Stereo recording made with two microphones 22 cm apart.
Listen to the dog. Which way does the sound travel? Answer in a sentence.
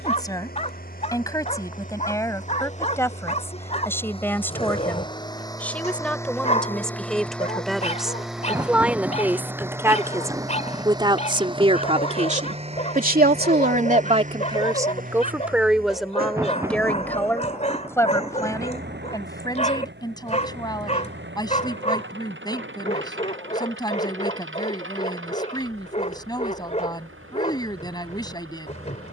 In this clip you hear the dog stay in one place.